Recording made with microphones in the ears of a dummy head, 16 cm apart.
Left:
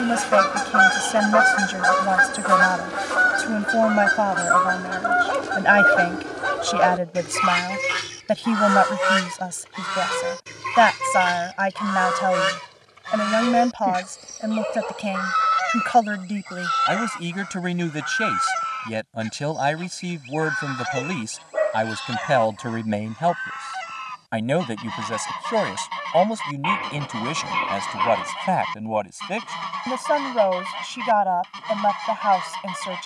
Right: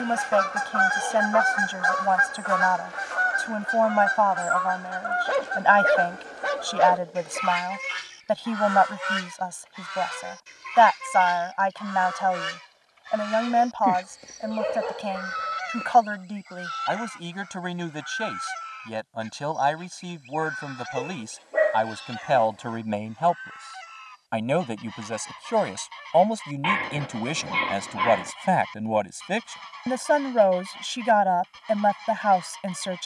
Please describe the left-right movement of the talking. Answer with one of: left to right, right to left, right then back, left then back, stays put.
left to right.